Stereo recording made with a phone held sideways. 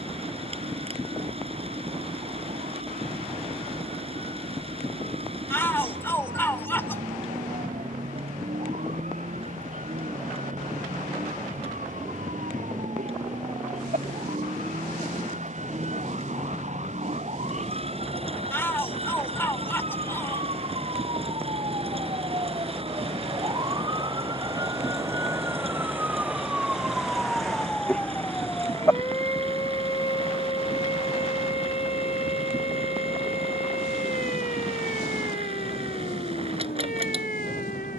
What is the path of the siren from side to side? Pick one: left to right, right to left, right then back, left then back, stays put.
right to left.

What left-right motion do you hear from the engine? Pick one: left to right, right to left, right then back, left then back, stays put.
stays put.